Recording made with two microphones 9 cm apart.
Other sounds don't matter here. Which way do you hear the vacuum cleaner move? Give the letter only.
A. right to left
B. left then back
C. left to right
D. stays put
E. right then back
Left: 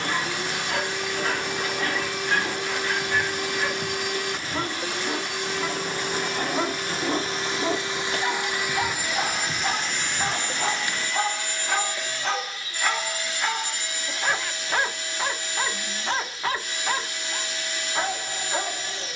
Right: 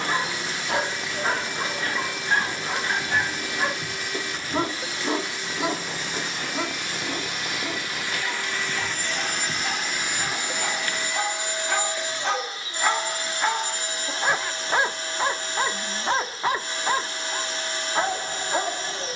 C.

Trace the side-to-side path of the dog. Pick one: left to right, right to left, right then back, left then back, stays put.
left then back.